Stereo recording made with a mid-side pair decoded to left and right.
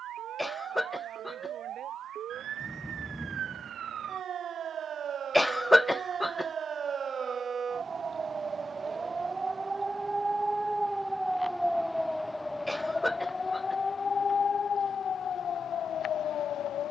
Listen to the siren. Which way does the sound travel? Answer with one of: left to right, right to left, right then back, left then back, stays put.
right to left.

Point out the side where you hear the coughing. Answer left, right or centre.
centre.